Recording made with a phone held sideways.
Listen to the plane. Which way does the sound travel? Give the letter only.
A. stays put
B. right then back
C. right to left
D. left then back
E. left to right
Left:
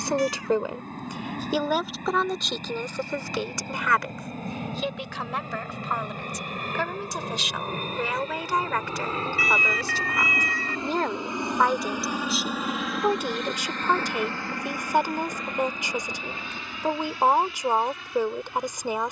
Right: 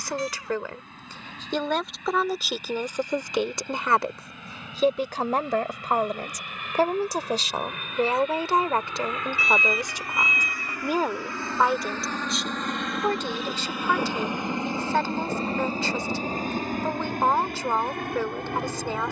E.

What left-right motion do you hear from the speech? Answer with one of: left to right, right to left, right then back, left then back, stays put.
right then back.